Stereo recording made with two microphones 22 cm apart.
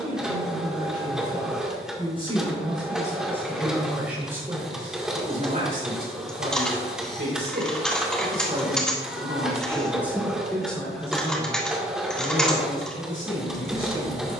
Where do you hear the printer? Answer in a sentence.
In this clip you hear the printer in the centre.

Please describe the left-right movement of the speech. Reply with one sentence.
In this clip you hear the speech move from left to right and back again.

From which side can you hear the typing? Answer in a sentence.
In this clip you hear the typing in the centre.